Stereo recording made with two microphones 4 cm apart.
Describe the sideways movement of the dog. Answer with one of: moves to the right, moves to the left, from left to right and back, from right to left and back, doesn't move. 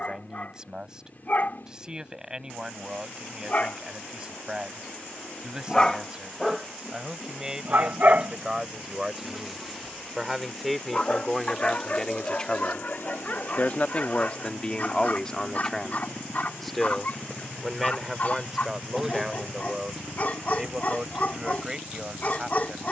from left to right and back.